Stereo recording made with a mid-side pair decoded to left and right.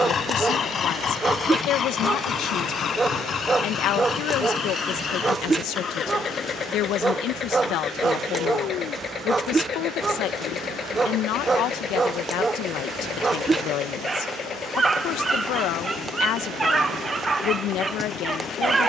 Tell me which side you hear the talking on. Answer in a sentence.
You can hear the talking on the left.